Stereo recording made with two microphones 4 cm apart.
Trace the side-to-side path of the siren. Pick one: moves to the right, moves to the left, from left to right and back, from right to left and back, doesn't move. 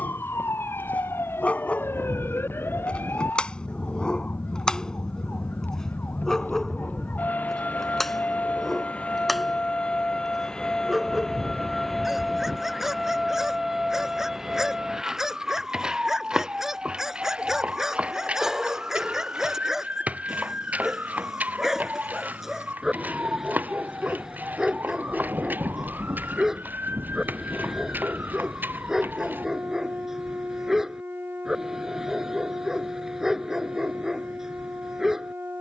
moves to the right.